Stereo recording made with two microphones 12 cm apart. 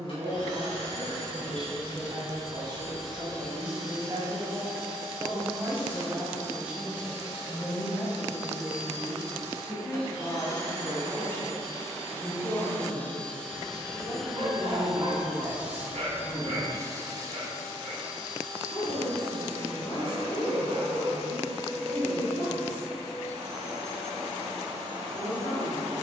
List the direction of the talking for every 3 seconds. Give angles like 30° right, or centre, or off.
50° right, 30° right, 10° right, 10° left, 30° left, 30° left, 40° left, 50° left, 50° left.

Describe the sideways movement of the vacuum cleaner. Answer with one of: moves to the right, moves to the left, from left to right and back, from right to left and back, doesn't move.
moves to the right.